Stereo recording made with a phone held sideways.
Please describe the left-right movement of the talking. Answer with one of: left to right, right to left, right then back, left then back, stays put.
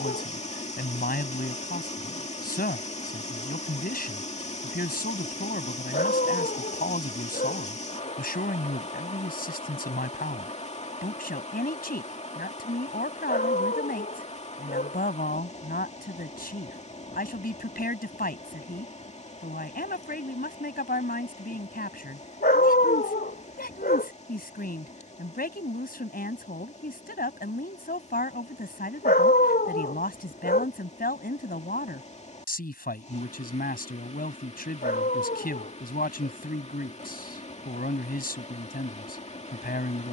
stays put.